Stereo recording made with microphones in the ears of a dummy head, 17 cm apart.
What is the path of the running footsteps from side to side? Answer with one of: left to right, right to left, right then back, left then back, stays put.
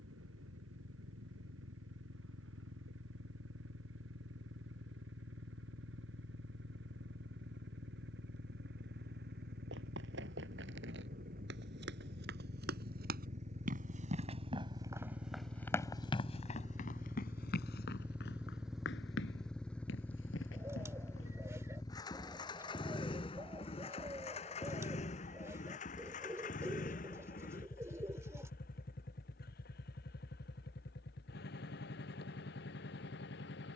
right to left.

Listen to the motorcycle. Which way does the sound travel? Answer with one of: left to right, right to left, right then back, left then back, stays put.
right to left.